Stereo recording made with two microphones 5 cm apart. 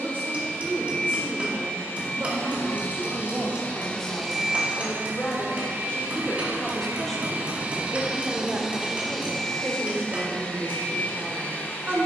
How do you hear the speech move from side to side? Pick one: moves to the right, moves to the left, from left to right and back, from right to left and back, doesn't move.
from right to left and back.